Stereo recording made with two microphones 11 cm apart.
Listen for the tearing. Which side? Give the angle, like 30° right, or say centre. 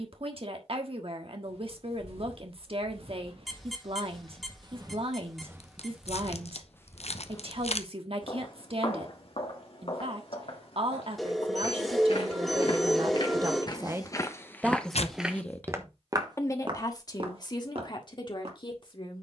80° left.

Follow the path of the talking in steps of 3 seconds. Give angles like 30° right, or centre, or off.
60° right, 60° right, 60° right, 60° right, 40° right, 30° left, 50° left.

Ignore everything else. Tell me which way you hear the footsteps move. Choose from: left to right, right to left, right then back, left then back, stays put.
left then back.